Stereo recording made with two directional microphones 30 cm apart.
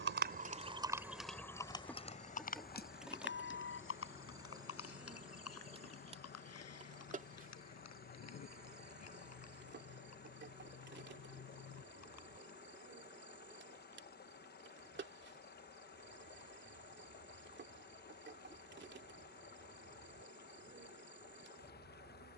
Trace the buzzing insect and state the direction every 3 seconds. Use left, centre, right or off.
centre, centre, right, right, right, right, right, right.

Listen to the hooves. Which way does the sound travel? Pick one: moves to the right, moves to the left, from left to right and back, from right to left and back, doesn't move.
moves to the left.